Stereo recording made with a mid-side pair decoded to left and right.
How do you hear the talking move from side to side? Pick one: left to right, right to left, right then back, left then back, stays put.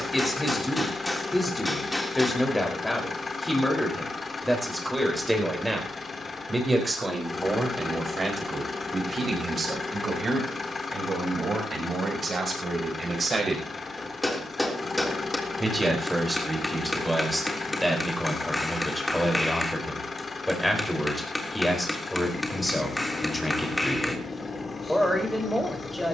right then back.